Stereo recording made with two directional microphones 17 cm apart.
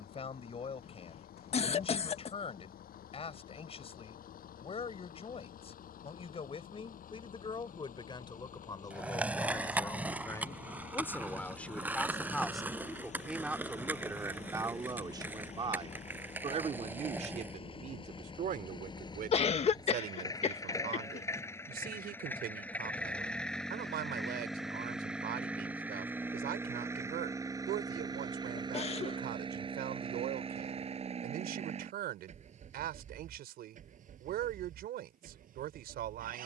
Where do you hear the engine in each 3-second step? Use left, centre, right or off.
left, left, left, left, left, left, left, centre, centre, right, right, right.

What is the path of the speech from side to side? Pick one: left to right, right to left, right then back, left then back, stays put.
left to right.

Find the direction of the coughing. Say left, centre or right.
left.